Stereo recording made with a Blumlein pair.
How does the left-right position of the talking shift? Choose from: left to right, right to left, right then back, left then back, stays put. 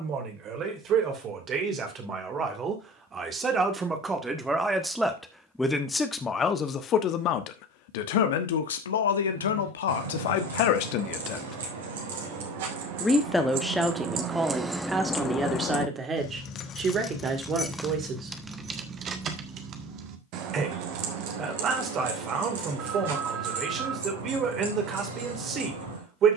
left then back.